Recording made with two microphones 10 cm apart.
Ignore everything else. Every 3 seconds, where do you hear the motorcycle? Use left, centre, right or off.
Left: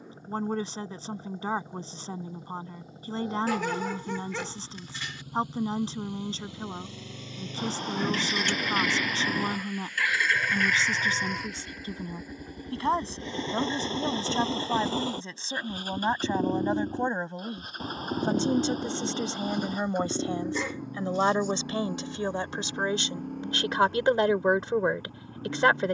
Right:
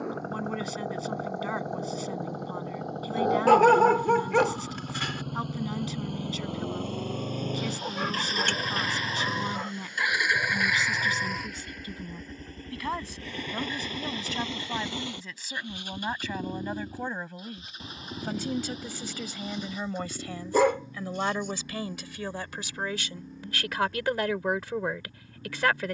right, right, right, centre, left, left, left, left, left.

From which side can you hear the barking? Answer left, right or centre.
right.